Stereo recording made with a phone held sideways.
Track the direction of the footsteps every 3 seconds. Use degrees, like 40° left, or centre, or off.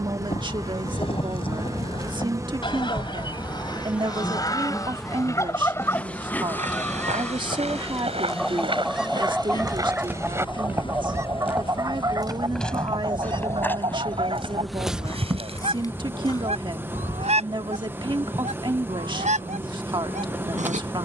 off, off, 50° right, 20° right, 10° left, 30° left, off.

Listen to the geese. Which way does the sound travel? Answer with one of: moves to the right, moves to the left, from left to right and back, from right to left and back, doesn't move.
moves to the right.